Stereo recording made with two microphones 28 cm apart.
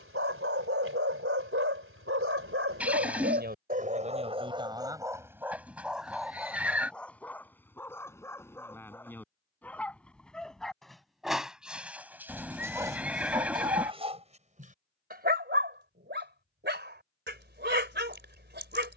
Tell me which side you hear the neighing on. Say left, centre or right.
centre.